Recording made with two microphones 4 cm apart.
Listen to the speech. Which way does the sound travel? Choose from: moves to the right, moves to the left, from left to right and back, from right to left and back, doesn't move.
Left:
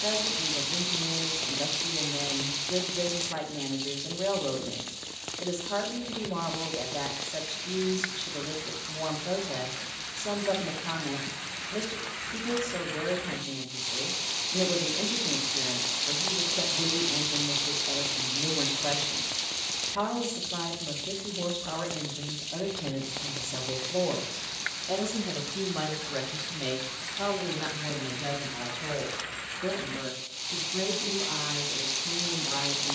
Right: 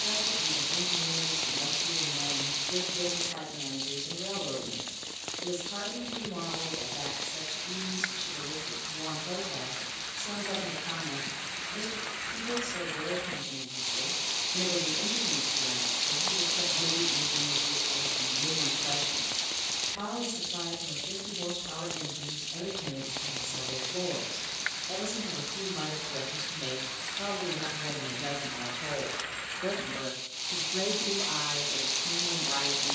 moves to the right.